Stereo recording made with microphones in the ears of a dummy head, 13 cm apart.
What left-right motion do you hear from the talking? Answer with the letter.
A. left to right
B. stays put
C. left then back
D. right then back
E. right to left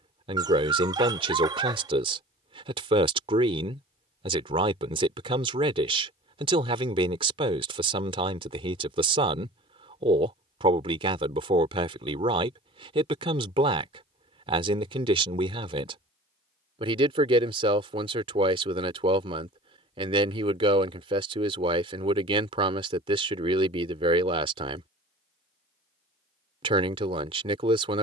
B.